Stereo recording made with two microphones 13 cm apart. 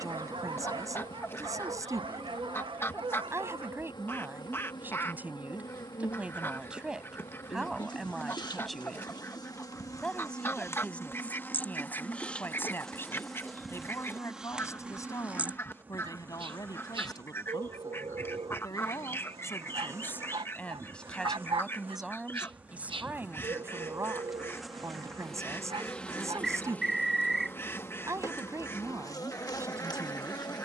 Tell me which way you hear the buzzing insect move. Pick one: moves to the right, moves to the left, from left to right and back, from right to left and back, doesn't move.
from left to right and back.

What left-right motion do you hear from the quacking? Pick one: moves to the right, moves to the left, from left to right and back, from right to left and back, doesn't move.
doesn't move.